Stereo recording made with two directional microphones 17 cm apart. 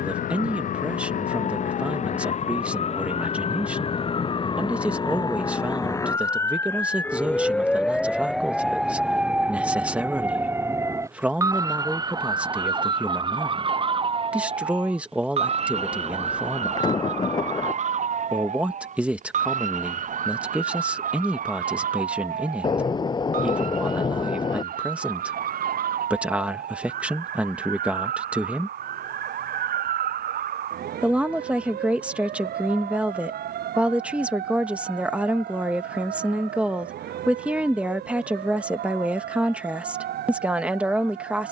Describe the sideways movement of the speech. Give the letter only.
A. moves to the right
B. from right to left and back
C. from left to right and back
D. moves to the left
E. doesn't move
E.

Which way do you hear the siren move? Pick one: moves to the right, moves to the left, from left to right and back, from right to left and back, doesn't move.
moves to the right.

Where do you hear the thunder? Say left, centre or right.
left.